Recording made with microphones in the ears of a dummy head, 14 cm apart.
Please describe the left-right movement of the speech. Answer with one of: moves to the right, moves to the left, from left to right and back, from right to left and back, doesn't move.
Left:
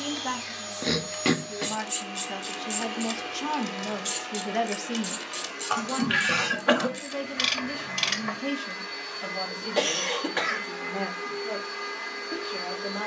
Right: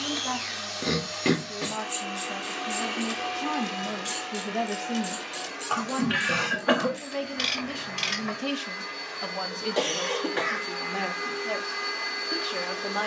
moves to the right.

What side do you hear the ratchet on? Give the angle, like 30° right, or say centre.
20° left.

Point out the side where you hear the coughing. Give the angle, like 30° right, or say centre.
20° left.